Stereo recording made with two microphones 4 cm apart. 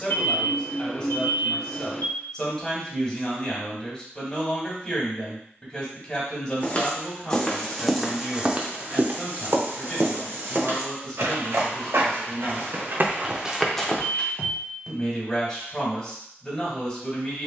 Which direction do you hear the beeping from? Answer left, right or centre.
left.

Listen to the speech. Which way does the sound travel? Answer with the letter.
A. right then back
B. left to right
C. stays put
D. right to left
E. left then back
C.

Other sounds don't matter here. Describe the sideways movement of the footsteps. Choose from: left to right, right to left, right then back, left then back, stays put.
right then back.